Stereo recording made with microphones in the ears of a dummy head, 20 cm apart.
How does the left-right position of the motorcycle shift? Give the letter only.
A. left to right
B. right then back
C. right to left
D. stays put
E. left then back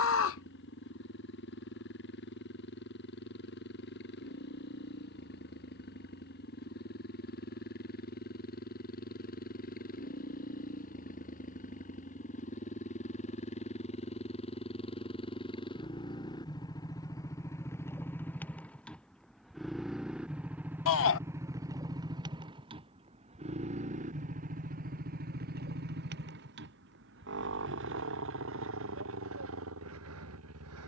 A.